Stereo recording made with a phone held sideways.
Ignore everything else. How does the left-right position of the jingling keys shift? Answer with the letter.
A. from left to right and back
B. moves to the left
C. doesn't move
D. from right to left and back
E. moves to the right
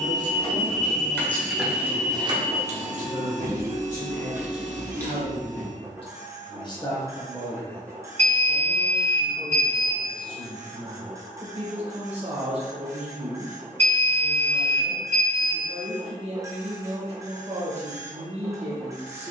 A.